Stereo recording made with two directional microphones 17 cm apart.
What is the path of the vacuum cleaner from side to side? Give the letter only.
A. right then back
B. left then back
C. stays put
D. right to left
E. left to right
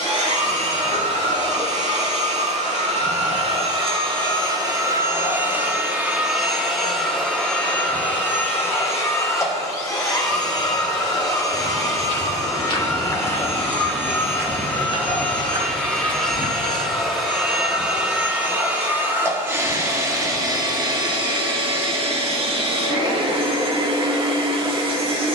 B.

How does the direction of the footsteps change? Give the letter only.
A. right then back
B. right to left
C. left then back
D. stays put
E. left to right
E.